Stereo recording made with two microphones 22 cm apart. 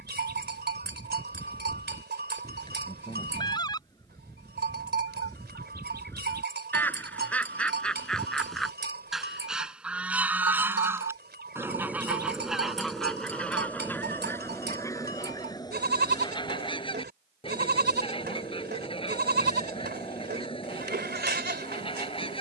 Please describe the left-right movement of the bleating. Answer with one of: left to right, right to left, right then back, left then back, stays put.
stays put.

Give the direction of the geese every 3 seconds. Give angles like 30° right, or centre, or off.
20° left, 20° left, 10° left, 10° right, centre, 20° left, 20° left, 20° left.